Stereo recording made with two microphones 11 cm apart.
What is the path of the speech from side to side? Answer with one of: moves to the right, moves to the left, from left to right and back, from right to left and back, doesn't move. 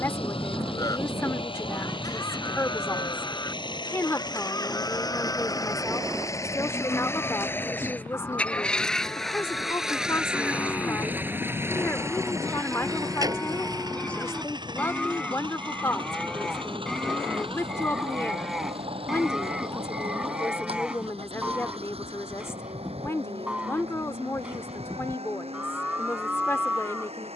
doesn't move.